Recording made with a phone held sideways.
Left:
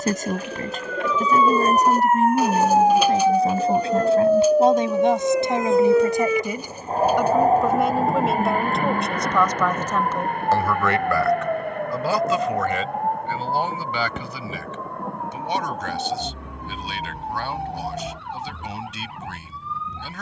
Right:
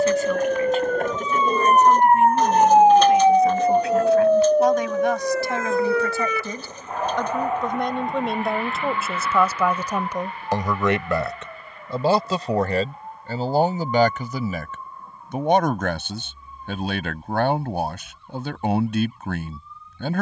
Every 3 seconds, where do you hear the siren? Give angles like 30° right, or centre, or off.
40° right, centre, 40° left, 50° left, 60° left, 70° left, 70° left.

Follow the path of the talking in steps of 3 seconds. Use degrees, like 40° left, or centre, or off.
40° left, 30° left, 10° left, 20° right, 40° right, 60° right, 60° right.